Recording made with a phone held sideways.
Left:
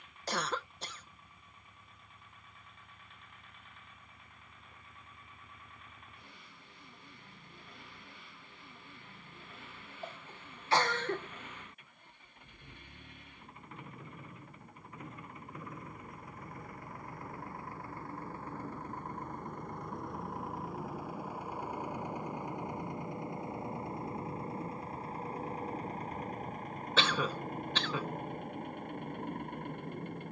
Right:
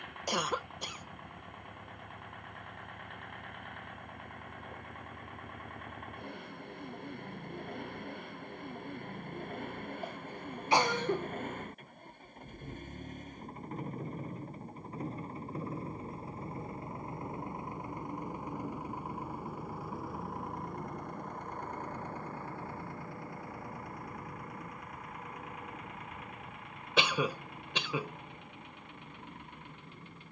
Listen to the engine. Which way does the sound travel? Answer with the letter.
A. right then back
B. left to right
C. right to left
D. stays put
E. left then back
C.